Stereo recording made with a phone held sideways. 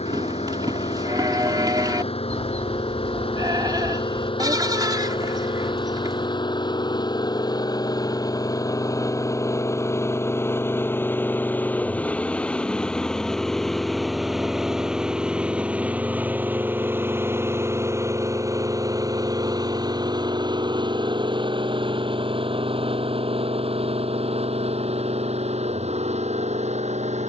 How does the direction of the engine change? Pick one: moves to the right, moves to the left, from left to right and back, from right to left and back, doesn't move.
moves to the right.